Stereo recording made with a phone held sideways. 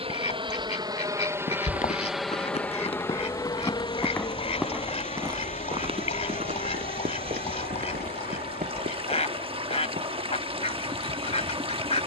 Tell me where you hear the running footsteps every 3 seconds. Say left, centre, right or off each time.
left, centre, right, right.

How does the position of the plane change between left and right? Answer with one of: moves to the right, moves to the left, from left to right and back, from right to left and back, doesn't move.
moves to the left.